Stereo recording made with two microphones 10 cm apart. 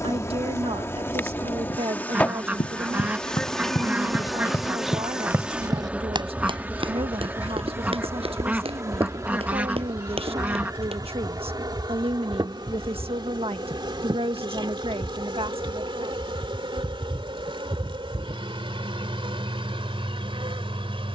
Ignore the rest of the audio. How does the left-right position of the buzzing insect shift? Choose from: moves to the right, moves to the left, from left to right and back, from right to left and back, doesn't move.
moves to the right.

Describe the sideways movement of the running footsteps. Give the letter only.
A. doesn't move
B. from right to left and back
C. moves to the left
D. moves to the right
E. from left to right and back
D.